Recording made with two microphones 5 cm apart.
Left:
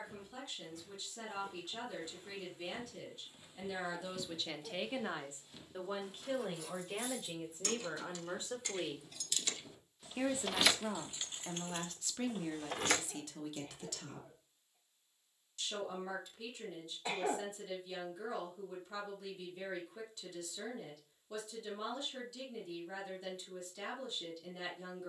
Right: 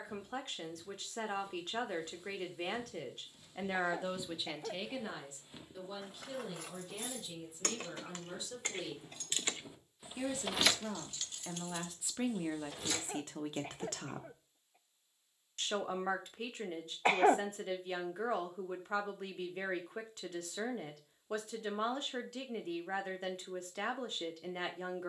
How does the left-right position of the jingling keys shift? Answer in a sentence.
In this clip you hear the jingling keys move from right to left.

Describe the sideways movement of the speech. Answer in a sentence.
In this clip you hear the speech go left and come back.